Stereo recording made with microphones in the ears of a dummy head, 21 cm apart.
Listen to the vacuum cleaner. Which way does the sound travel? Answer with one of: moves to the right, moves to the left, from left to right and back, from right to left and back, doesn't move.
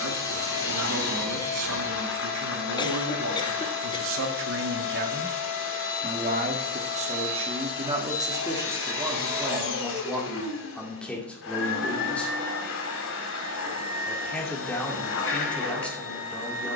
doesn't move.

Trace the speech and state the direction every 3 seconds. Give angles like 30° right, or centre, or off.
70° right, 50° right, 20° right, centre, centre, centre.